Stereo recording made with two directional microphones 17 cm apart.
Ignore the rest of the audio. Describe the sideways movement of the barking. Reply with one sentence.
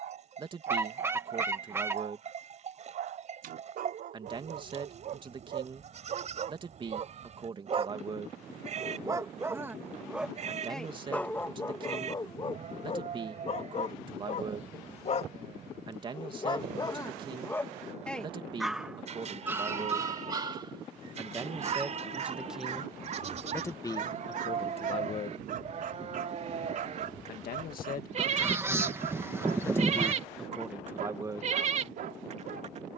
In this clip you hear the barking move from right to left and back again.